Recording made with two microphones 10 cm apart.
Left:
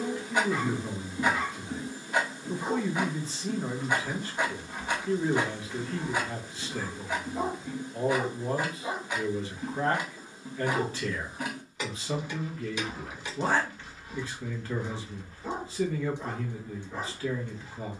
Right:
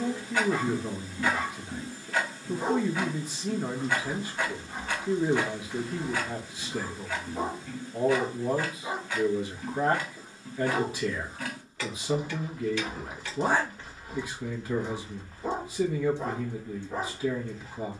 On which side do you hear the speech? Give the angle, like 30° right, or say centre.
10° right.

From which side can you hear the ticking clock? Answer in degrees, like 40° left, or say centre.
20° left.